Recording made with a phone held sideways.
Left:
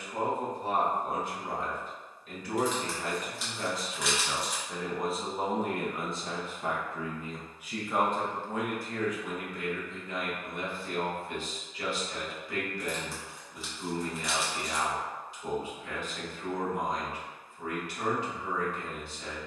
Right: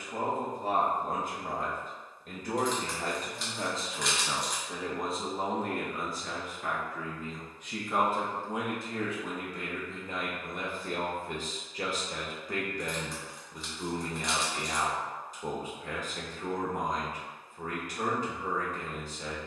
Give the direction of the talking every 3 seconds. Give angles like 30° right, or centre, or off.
50° right, 10° right, 10° left, 40° right, 40° right, 40° right, 40° right.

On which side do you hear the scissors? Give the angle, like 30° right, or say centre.
centre.